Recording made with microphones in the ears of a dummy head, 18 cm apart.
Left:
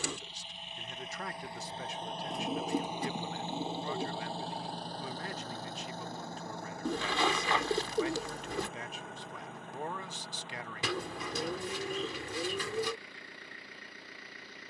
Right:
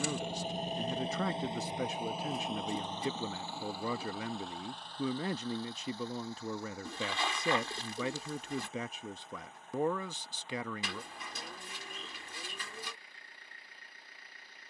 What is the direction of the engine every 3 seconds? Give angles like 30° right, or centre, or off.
20° right, 30° left, 50° left, 60° left, 60° left.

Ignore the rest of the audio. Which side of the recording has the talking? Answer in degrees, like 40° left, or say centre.
80° right.